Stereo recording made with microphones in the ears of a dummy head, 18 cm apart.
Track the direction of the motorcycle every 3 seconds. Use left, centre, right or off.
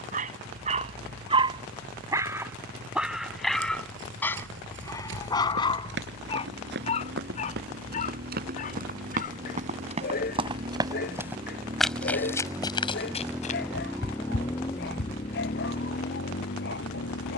right, right, right, right, centre, left.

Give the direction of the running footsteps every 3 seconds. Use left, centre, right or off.
off, right, right, right, left, off.